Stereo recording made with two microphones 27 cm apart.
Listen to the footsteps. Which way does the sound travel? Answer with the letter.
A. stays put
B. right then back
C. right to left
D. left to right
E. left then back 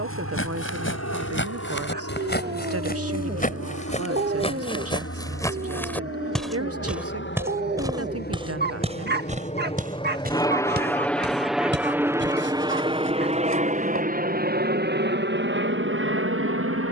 D.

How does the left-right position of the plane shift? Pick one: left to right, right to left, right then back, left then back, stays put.
left to right.